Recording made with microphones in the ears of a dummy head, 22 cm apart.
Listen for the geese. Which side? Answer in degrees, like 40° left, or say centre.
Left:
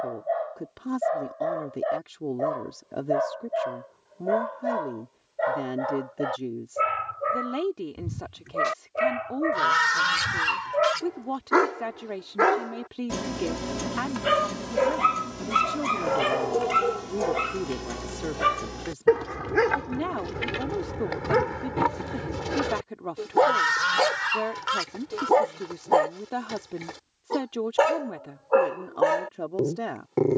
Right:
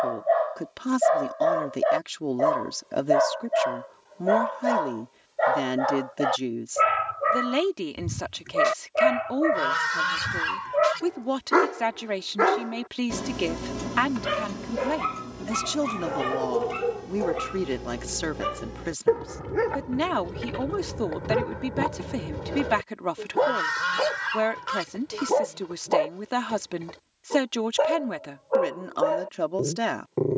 20° left.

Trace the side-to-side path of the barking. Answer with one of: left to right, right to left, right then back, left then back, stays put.
right to left.